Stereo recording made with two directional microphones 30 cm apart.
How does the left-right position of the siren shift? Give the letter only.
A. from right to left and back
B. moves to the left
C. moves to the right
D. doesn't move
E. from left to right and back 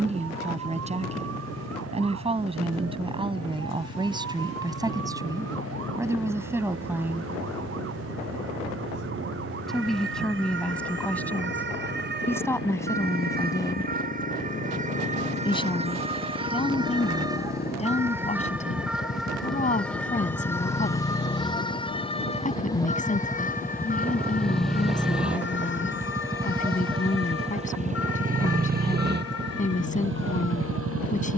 B.